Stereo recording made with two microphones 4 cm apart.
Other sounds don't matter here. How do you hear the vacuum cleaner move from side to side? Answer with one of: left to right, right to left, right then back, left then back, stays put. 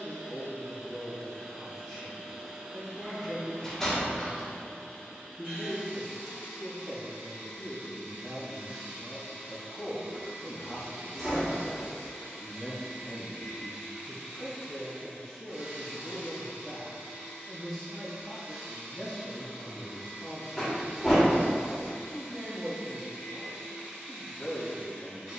stays put.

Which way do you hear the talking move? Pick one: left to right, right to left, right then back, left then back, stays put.
stays put.